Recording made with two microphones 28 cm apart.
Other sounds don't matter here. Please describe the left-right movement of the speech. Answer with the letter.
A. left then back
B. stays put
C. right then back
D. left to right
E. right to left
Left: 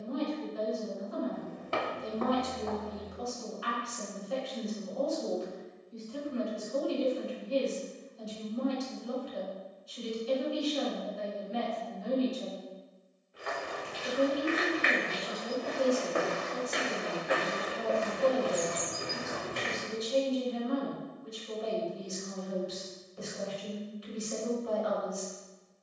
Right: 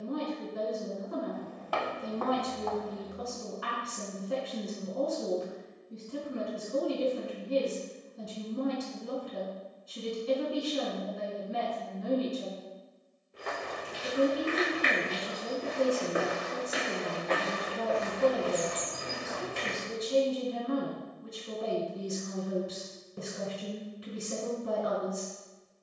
B.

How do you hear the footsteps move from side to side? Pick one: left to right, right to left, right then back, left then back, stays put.
right to left.